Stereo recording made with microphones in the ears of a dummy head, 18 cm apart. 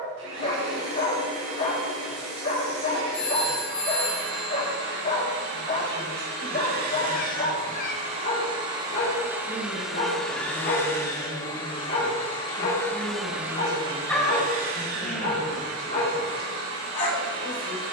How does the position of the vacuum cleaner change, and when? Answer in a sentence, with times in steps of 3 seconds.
You can hear the vacuum cleaner on the right from 0 s, in the centre from 9 s and on the right from 15 s.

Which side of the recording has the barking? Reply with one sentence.
In this clip you hear the barking on the left.